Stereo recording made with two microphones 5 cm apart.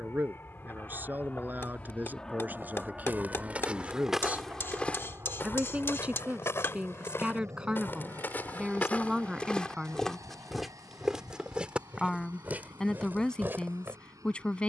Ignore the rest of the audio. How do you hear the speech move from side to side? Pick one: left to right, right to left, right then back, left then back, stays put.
right to left.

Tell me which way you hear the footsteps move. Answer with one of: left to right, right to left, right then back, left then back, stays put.
left then back.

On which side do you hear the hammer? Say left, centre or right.
left.